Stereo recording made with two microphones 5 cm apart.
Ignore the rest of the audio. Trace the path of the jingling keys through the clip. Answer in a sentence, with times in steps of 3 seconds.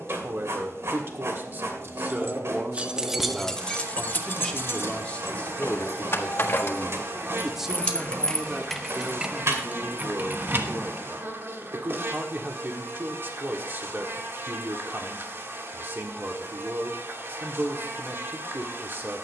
In this clip you hear the jingling keys on the right from 0 s, on the left from 3 s, on the right from 9 s and not at all from 12 s.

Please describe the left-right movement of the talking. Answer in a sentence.
In this clip you hear the talking move from right to left and back again.